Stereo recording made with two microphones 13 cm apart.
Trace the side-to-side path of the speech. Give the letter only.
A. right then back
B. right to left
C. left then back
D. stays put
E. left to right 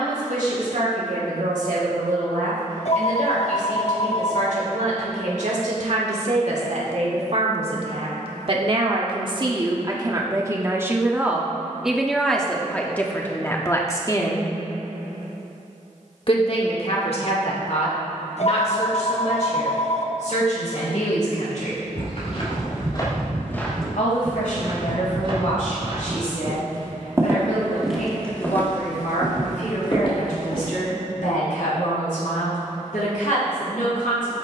B.